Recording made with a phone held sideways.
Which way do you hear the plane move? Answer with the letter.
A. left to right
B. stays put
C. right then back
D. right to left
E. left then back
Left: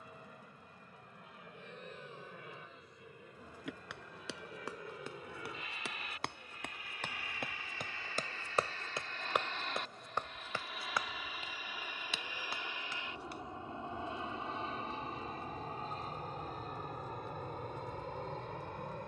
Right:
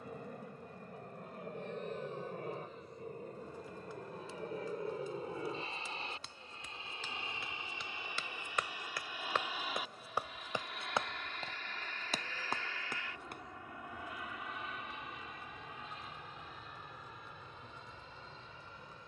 D.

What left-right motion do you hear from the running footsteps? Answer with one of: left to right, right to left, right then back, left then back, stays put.
left to right.